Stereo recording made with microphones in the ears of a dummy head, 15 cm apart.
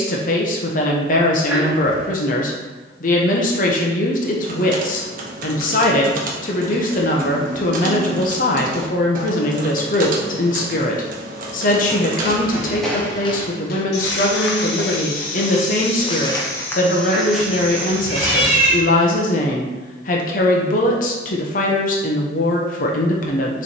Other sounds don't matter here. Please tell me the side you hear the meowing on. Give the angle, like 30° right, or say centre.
10° right.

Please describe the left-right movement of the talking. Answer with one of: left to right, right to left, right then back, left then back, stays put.
stays put.